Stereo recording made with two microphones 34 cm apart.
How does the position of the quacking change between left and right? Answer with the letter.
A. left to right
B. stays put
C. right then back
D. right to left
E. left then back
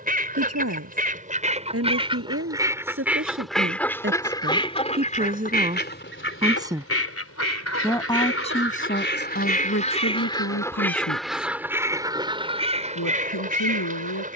E.